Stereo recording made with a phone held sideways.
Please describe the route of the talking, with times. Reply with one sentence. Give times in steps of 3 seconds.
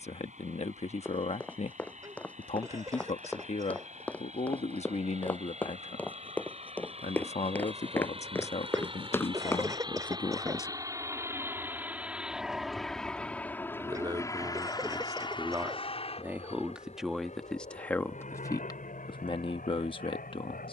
In this clip you hear the talking on the left from 0 s, on the right from 12 s, in the centre from 15 s and on the left from 18 s.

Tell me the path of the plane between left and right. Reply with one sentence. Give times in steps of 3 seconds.
In this clip you hear the plane on the right from 0 s, in the centre from 12 s and on the left from 15 s.